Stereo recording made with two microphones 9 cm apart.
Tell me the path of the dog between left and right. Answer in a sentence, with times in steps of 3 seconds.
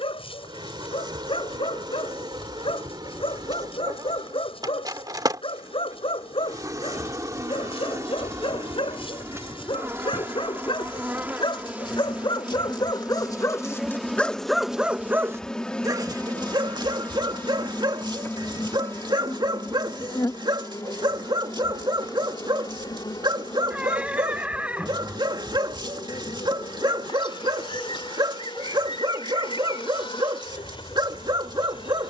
In this clip you hear the dog on the left from 0 s and on the right from 15 s.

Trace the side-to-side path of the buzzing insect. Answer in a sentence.
In this clip you hear the buzzing insect move from right to left.